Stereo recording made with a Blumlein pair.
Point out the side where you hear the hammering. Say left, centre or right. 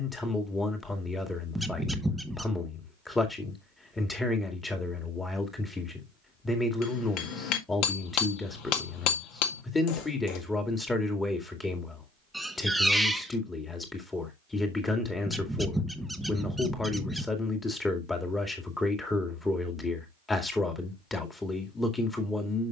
left.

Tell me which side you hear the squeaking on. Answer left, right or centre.
centre.